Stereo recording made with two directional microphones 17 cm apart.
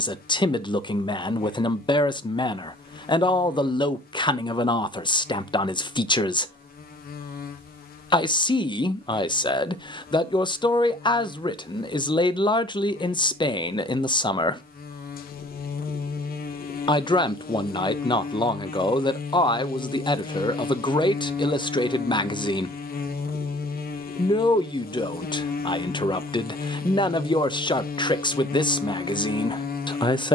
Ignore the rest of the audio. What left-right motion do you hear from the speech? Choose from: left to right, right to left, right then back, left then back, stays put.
stays put.